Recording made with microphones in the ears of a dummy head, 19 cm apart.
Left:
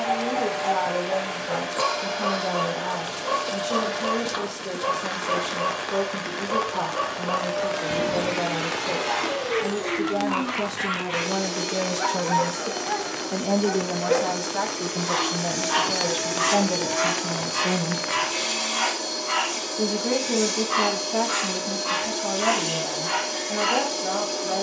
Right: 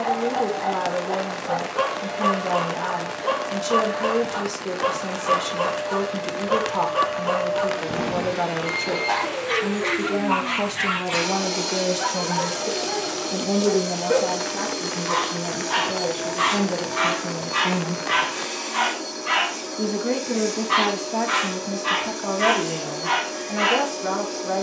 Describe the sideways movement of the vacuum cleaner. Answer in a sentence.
In this clip you hear the vacuum cleaner move from left to right and back again.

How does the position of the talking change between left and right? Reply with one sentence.
In this clip you hear the talking move from right to left and back again.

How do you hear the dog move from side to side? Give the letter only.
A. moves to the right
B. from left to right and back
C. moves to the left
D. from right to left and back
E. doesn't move
D.